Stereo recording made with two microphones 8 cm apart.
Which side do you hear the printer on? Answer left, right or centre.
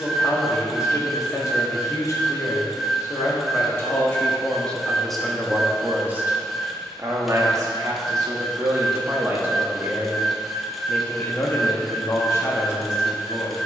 centre.